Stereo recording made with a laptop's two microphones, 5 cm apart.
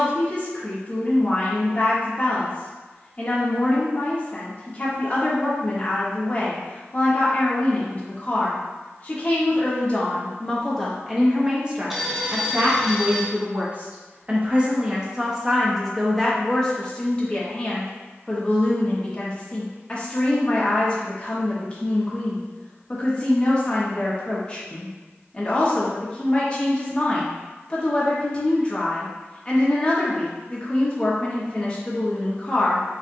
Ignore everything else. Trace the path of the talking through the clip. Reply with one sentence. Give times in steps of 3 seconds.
In this clip you hear the talking on the left from 0 s, in the centre from 9 s, on the right from 12 s, in the centre from 15 s and on the left from 18 s.